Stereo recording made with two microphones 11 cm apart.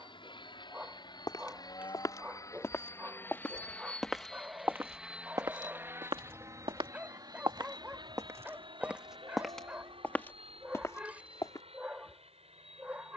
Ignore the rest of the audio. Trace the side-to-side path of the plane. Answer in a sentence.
You can hear the plane move from left to right.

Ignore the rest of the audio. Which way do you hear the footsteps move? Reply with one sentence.
In this clip you hear the footsteps go right and come back.